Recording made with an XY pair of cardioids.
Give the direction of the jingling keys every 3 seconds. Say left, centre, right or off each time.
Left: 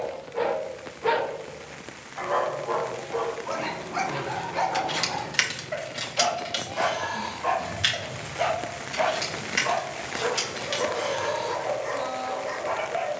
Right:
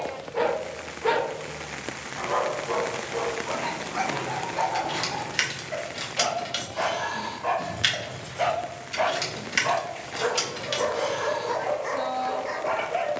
off, left, centre, centre, off.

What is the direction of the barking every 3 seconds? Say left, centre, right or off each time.
centre, left, centre, right, right.